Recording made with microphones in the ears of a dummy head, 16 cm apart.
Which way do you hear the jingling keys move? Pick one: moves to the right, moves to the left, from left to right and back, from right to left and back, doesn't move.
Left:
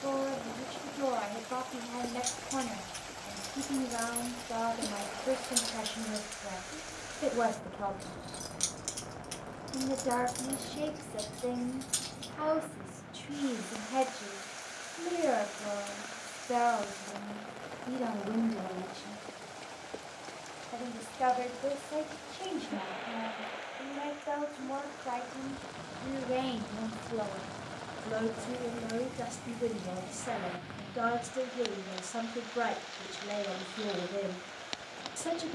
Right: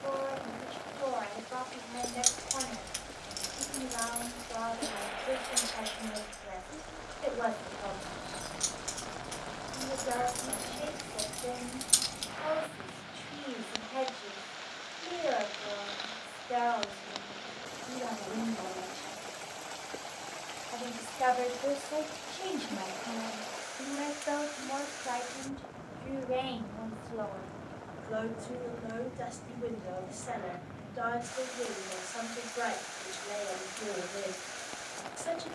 from right to left and back.